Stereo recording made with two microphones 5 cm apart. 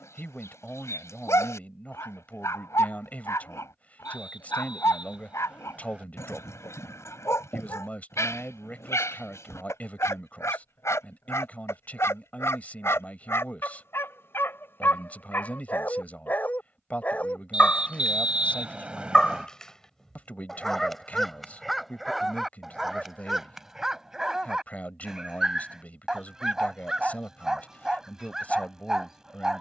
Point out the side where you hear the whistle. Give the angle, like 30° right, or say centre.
20° right.